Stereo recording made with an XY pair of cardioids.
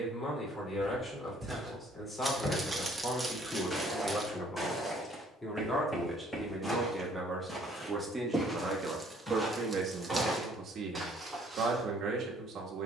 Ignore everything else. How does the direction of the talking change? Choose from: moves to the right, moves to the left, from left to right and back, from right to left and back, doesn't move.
moves to the right.